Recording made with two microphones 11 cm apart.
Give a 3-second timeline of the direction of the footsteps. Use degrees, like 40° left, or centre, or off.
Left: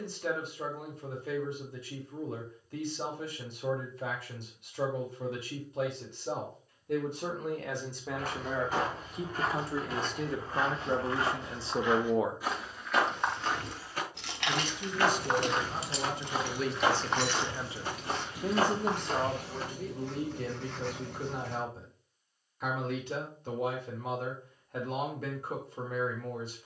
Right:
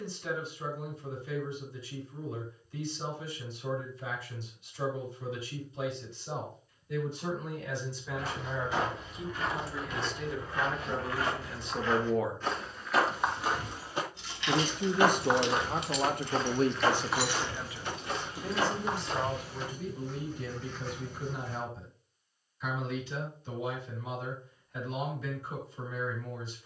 off, off, 50° left, 30° left, 10° right, 10° left, 40° left, off, off.